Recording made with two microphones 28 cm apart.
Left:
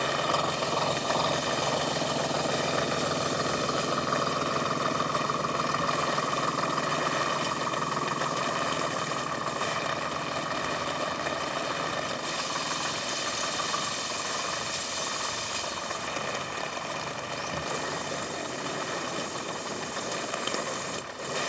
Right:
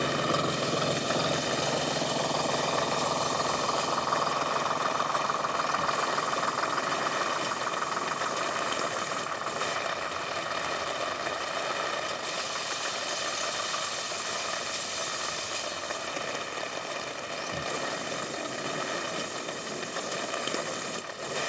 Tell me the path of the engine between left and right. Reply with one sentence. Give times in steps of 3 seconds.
In this clip you hear the engine in the centre from 0 s and on the left from 3 s.